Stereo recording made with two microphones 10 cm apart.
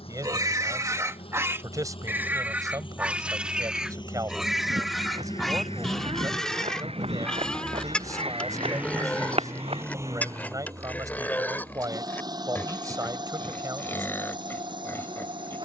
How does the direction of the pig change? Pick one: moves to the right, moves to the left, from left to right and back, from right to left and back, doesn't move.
moves to the left.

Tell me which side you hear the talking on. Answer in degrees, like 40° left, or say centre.
30° right.